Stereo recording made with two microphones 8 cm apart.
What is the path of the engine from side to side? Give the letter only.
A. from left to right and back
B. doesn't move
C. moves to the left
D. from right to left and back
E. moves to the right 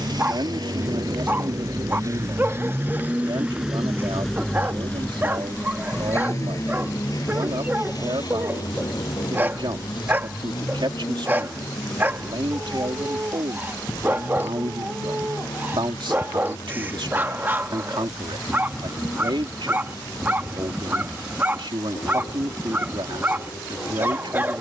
C.